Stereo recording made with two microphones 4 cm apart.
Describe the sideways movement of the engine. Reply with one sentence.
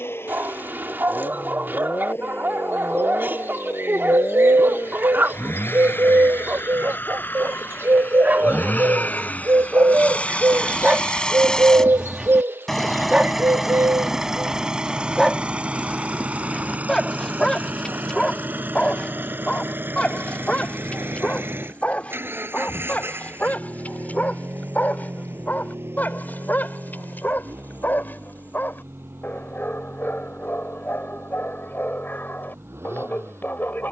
In this clip you hear the engine travel towards the right.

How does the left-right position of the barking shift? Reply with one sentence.
In this clip you hear the barking travel towards the left.